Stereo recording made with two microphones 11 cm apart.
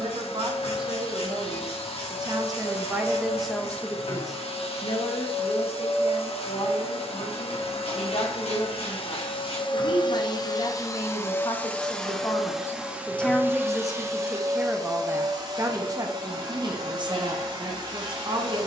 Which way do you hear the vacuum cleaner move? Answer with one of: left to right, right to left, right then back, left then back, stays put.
left to right.